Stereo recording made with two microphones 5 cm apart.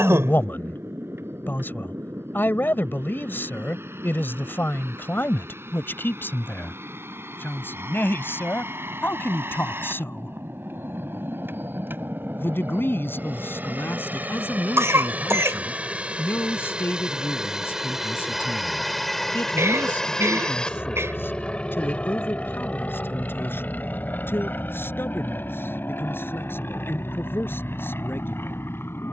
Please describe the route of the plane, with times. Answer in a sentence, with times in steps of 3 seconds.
You can hear the plane on the right from 0 s, in the centre from 18 s and on the left from 21 s.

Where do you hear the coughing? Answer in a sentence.
In this clip you hear the coughing on the right.